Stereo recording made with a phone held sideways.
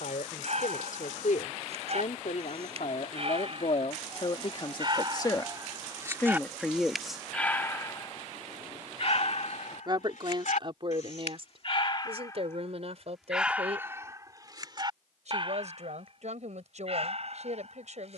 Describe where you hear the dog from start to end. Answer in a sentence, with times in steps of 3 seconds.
In this clip you hear the dog on the right from 0 s, in the centre from 6 s, on the left from 9 s, in the centre from 12 s and on the right from 15 s.